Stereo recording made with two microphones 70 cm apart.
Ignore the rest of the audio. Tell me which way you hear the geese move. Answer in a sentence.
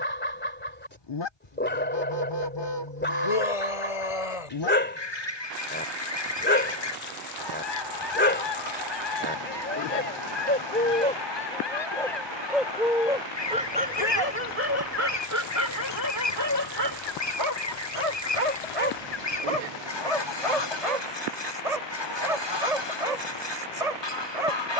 In this clip you hear the geese stay put.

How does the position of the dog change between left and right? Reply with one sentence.
In this clip you hear the dog go from the left side to the right.